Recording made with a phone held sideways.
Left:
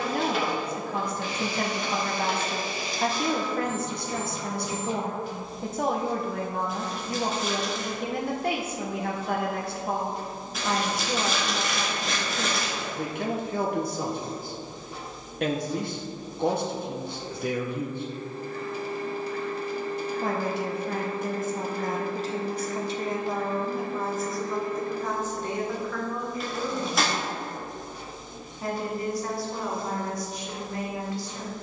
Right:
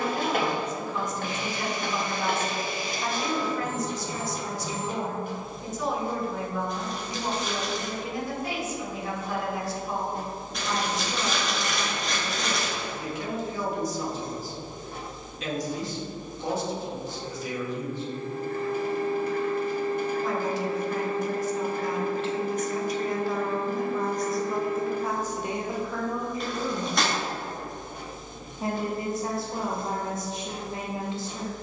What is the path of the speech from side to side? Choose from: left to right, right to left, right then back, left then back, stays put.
left to right.